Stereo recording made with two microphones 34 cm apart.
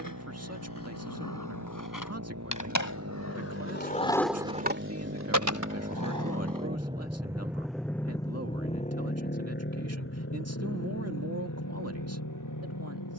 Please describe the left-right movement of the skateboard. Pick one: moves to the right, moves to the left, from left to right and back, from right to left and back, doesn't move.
moves to the right.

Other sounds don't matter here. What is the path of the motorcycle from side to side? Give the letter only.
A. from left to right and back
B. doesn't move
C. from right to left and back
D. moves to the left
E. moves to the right
D.